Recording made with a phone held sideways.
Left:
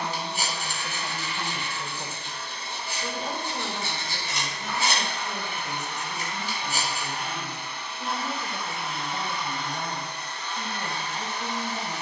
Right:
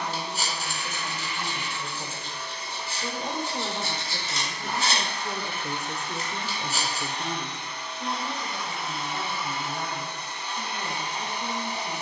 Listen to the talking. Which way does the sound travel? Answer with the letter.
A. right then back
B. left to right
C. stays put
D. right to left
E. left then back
A.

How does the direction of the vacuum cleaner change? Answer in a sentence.
In this clip you hear the vacuum cleaner move to the right.